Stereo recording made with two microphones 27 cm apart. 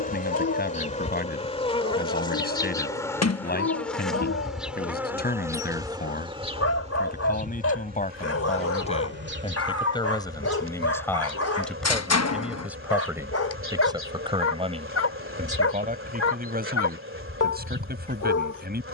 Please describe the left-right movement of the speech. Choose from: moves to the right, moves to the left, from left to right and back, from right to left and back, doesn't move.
moves to the right.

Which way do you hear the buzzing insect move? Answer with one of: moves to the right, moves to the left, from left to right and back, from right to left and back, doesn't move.
moves to the right.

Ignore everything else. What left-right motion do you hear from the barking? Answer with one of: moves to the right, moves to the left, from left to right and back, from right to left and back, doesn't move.
doesn't move.